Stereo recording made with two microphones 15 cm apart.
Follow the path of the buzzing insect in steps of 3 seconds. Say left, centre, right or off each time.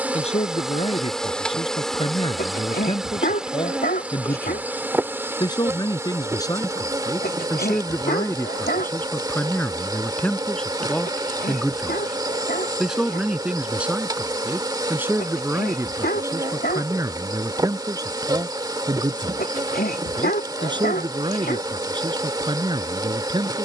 centre, centre, right, right, right, right, right, right.